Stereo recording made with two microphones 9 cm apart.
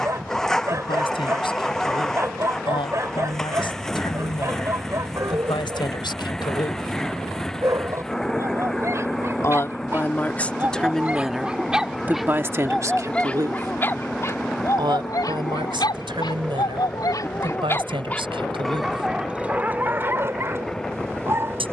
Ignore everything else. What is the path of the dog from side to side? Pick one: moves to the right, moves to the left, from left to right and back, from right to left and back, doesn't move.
from right to left and back.